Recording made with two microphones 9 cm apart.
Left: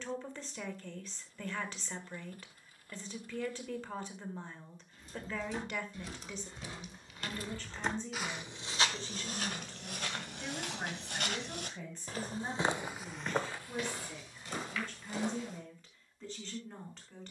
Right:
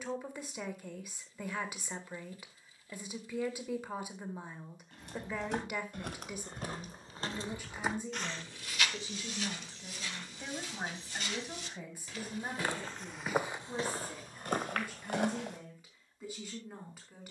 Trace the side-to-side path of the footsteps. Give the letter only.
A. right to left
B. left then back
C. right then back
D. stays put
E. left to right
B.